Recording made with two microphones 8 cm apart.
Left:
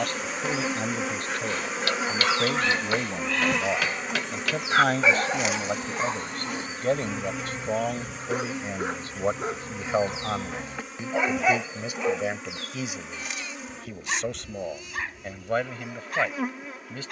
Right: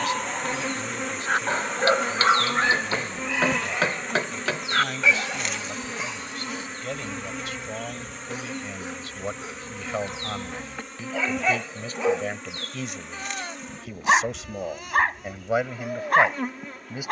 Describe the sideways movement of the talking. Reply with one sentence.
You can hear the talking move to the right.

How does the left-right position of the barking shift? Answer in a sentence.
You can hear the barking move from right to left and back again.